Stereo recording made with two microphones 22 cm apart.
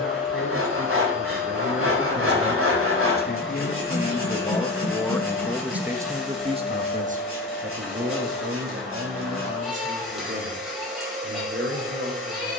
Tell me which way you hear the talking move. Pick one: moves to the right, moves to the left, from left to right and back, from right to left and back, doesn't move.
moves to the right.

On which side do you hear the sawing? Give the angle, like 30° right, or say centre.
70° right.